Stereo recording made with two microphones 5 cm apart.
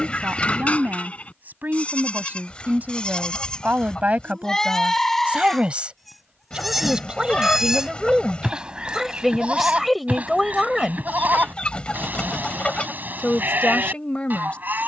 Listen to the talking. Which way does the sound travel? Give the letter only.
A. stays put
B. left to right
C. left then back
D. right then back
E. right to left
E.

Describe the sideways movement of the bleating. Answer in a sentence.
In this clip you hear the bleating move from left to right.